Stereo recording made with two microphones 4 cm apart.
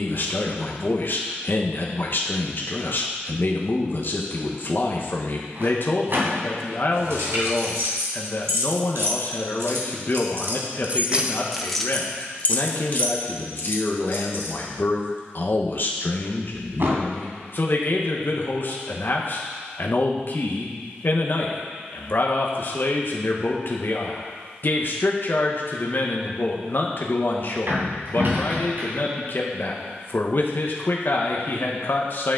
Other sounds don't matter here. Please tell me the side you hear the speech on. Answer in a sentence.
You can hear the speech on the left.